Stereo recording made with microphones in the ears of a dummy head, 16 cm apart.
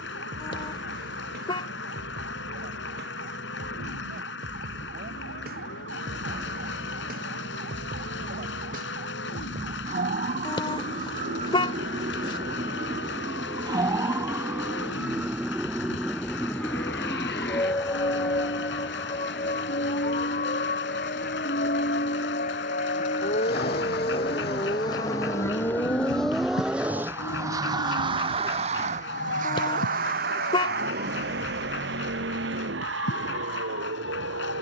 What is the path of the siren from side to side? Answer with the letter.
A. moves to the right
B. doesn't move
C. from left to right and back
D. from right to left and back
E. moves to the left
E.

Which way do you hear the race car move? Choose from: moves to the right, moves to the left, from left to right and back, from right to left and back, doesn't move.
moves to the right.